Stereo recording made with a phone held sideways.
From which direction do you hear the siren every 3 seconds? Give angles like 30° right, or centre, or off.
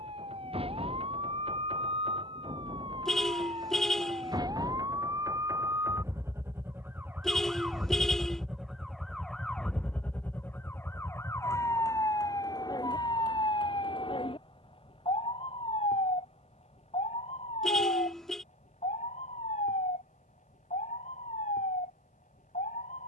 40° right, 30° right, 10° right, 10° left, 30° left, 50° left, 60° left, 70° left.